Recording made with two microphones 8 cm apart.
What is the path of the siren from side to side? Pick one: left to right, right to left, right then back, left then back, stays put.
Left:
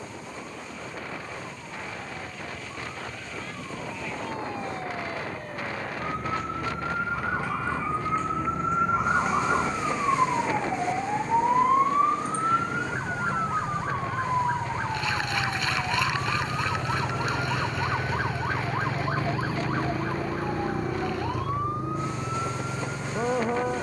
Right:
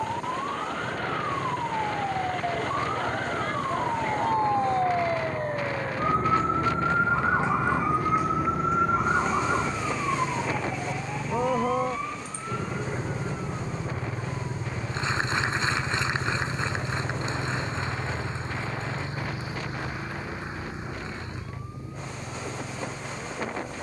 right to left.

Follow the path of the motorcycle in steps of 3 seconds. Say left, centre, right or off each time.
right, right, right, right, right, centre, left, left.